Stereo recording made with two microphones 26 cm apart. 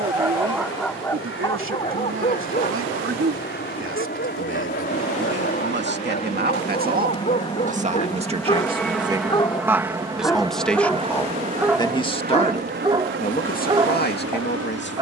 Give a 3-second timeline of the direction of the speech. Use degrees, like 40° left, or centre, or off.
50° right, 50° right, 30° right, centre, 30° left.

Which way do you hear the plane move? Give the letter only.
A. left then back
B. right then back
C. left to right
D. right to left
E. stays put
C.